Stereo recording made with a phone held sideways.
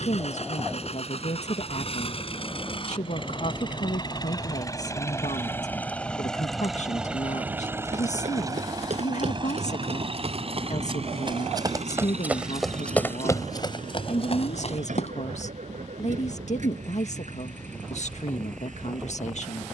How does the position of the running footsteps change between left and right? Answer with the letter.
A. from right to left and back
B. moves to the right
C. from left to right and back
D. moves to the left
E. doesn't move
D.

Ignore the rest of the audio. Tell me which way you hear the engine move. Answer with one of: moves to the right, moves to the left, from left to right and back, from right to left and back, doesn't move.
moves to the right.